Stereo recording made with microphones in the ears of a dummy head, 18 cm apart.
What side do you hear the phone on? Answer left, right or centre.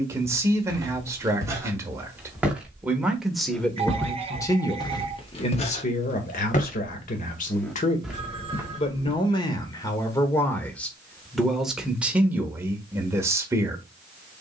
right.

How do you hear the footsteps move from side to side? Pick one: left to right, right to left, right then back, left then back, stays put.
left then back.